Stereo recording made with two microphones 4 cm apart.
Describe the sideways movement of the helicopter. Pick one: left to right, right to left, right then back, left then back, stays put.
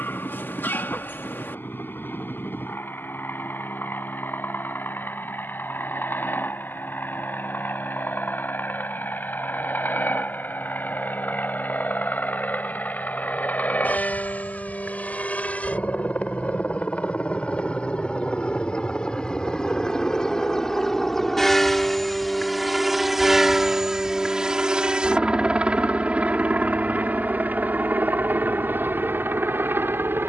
left to right.